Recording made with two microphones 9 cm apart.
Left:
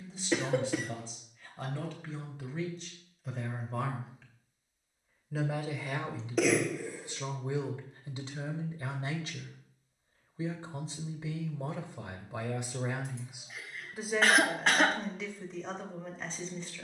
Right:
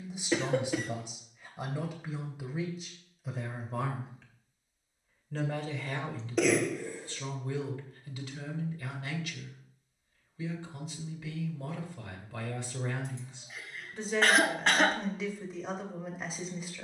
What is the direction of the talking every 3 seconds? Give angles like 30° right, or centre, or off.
20° right, centre, 20° left, 30° left, 10° left, 10° right.